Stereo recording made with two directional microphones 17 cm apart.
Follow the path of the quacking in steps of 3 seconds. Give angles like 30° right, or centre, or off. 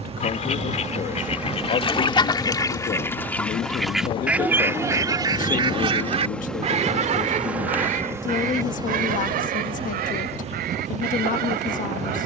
30° left, 10° right, 50° right, 60° right.